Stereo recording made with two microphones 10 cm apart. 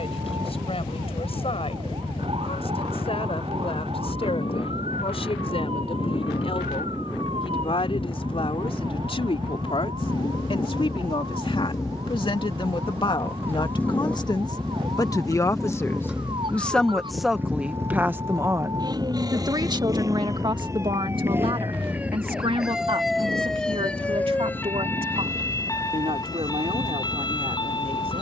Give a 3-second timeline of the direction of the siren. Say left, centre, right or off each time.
right, right, right, right, right, right, right, centre, left, left.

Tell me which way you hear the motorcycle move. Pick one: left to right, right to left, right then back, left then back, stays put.
left to right.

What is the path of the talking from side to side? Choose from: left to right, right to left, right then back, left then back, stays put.
left to right.